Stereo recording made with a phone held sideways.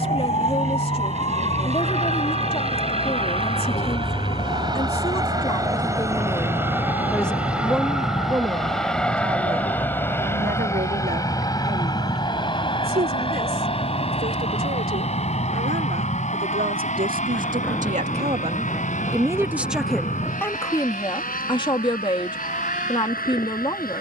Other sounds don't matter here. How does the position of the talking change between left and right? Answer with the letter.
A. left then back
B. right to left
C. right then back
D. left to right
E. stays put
C.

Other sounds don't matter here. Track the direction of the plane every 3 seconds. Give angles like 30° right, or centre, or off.
50° right, 30° right, 10° right, 20° left, 30° left, 50° left, 50° left, 60° left.